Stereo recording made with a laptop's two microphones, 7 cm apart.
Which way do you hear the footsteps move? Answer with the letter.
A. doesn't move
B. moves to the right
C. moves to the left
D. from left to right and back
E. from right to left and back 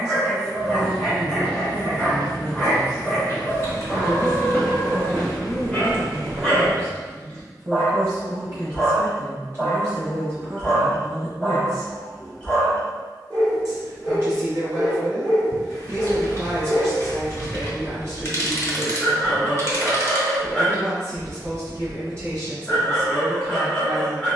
E.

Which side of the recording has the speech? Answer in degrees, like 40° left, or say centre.
40° right.